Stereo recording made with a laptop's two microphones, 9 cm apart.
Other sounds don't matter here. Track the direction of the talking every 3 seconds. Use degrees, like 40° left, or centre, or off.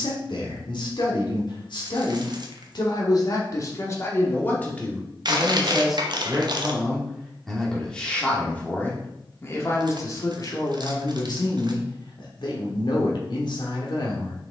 60° left, 20° left, 10° left, 40° left, 60° left.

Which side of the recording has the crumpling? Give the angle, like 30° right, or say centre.
50° right.